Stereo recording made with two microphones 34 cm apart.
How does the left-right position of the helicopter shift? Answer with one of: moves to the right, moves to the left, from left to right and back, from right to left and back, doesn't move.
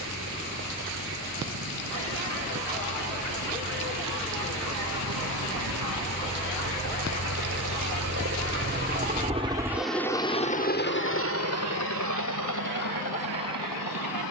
moves to the left.